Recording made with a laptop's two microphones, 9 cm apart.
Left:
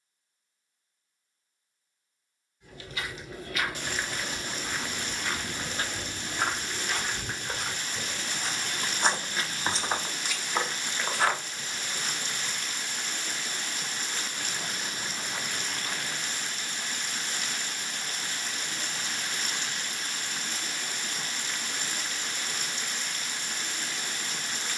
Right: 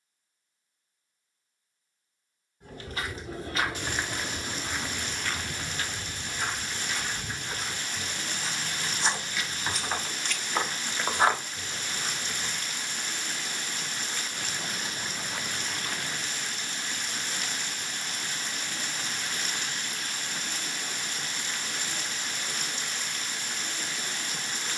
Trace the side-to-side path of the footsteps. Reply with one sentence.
You can hear the footsteps go left and come back.